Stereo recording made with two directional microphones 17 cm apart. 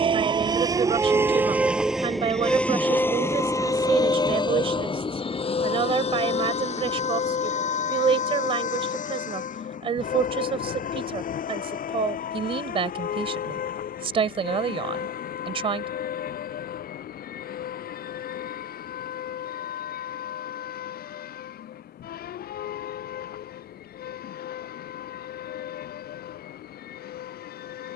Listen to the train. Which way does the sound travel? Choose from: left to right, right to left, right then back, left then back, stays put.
right to left.